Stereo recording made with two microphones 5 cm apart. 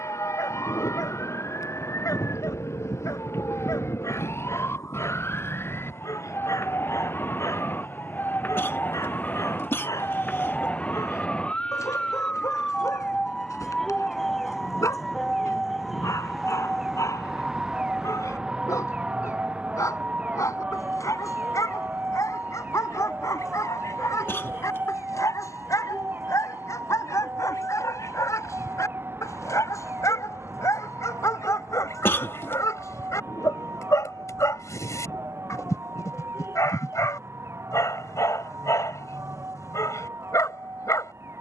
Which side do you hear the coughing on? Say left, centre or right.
left.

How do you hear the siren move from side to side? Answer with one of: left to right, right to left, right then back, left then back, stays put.
left to right.